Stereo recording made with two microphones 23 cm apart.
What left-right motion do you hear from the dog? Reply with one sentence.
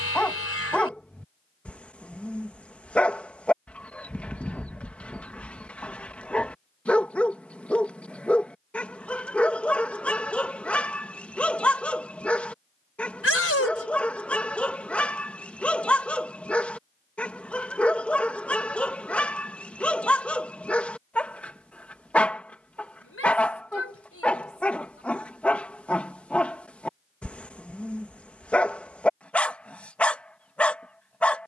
You can hear the dog stay in one place.